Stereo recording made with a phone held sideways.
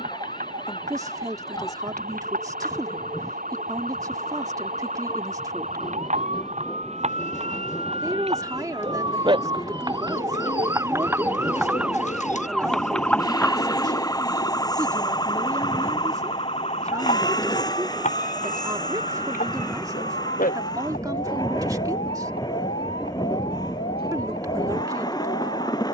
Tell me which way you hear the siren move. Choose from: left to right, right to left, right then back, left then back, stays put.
right to left.